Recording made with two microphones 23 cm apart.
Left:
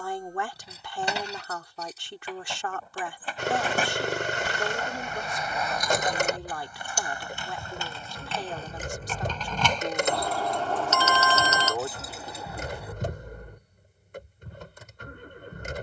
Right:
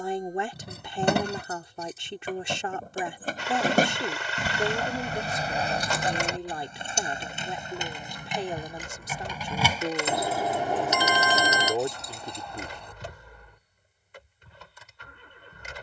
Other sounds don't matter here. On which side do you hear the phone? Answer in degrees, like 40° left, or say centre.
10° right.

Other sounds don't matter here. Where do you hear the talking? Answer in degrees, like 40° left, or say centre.
20° right.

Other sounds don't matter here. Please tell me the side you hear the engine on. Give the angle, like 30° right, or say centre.
50° left.